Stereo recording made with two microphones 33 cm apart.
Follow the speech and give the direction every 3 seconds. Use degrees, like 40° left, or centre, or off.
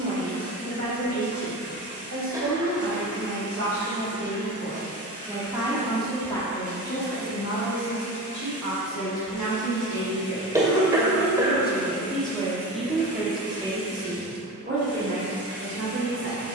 40° right, 30° right, 40° left, 50° left, 10° right, 40° right.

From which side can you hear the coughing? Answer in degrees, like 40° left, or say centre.
10° right.